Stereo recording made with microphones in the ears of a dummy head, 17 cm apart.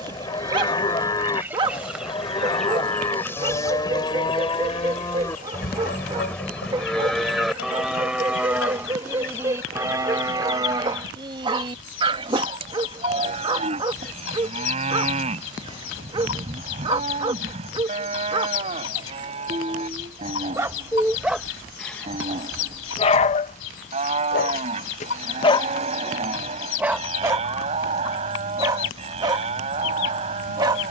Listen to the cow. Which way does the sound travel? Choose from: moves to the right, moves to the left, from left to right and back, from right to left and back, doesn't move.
moves to the right.